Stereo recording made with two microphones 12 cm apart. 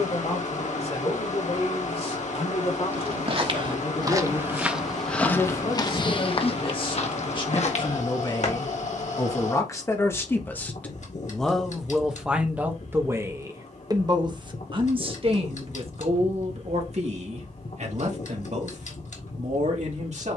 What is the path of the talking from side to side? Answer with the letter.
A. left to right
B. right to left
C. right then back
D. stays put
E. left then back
A.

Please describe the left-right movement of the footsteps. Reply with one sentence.
In this clip you hear the footsteps move from right to left.